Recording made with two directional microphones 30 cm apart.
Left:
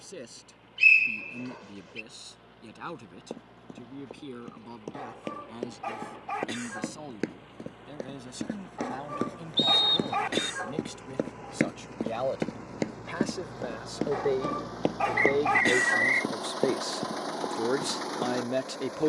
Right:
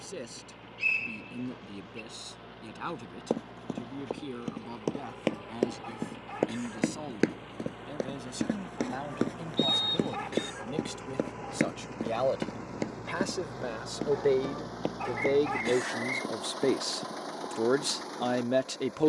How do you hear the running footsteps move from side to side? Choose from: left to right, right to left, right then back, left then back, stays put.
right to left.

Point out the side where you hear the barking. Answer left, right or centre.
left.